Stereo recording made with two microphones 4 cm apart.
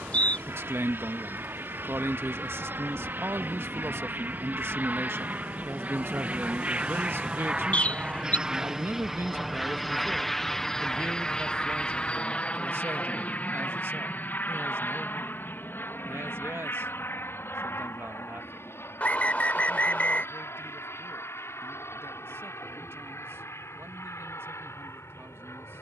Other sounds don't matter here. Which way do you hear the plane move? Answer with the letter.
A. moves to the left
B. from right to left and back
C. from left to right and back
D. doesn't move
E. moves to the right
A.